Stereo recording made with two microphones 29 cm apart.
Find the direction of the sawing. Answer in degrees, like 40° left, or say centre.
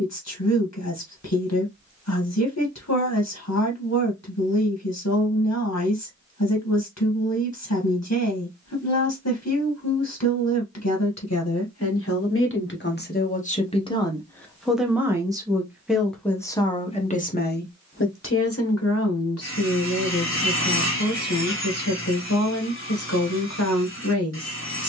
40° left.